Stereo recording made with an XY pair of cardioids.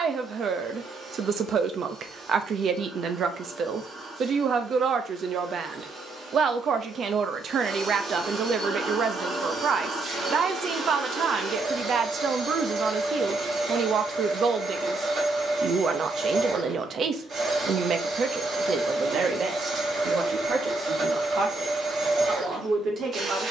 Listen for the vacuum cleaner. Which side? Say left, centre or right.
right.